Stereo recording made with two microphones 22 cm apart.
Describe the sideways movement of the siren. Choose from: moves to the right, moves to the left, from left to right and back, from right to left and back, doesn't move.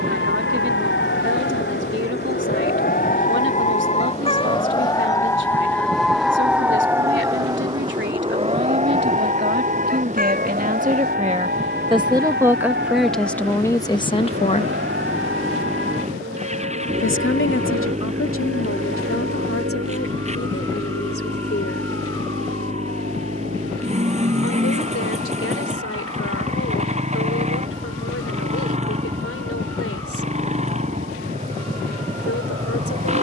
moves to the right.